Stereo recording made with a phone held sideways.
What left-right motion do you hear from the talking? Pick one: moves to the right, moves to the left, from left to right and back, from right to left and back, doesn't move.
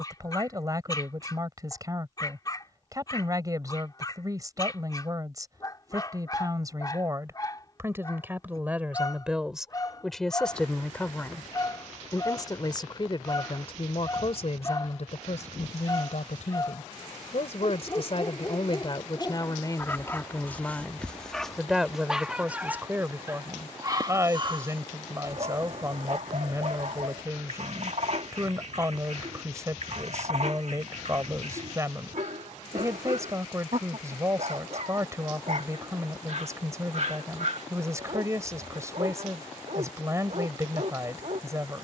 from right to left and back.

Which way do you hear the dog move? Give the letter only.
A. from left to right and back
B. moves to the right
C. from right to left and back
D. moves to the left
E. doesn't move
B.